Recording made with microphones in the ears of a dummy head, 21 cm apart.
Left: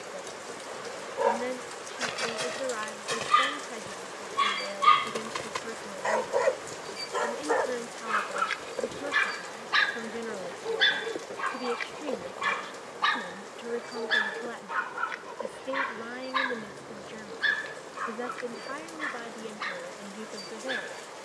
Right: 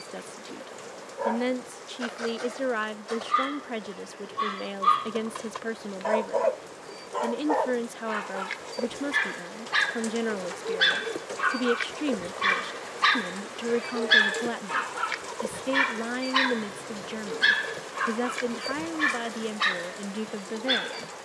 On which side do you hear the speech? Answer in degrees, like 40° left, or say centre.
60° right.